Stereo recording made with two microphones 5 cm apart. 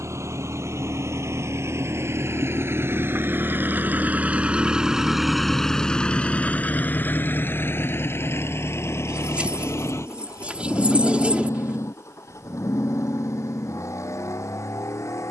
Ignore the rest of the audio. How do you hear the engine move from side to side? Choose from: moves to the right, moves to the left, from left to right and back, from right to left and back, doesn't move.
moves to the left.